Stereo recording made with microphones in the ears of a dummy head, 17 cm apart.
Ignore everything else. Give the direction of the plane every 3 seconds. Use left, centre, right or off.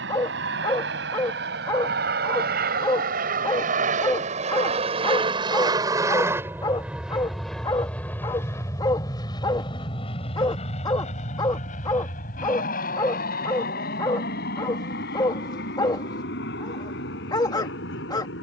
right, right, centre, left, left, left.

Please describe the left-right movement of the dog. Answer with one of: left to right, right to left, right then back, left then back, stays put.
stays put.